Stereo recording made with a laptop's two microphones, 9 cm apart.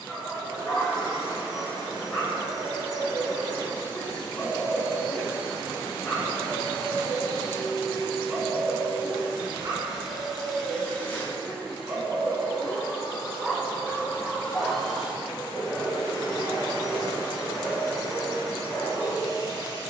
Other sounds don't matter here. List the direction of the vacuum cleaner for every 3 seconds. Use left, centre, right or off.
right, right, right, centre, left, right, right.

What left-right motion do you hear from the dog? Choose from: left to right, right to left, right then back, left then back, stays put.
right then back.